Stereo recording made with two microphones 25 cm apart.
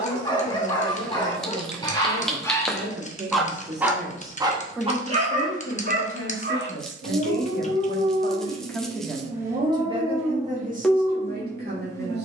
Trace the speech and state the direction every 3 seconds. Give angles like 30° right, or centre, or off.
40° right, centre, 30° left, 30° right.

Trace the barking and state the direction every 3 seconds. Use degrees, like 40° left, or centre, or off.
20° left, 20° right, 50° right, 10° right.